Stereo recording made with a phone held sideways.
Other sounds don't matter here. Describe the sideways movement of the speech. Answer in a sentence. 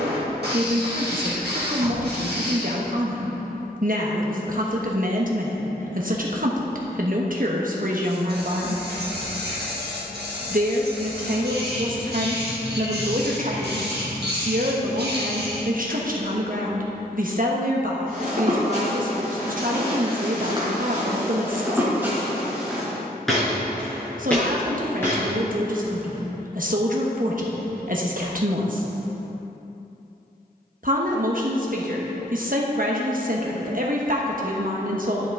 In this clip you hear the speech stay put.